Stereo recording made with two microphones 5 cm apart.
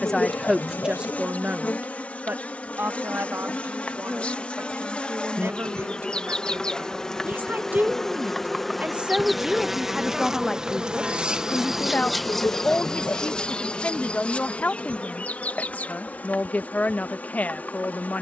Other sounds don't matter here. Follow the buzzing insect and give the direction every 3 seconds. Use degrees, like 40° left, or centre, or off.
40° left, 30° left, 10° left, 10° right, 20° left, 40° left.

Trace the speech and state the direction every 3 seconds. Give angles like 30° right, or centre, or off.
20° right, 60° right, 40° right, centre, 30° left, 30° left.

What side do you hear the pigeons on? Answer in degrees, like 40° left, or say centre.
70° left.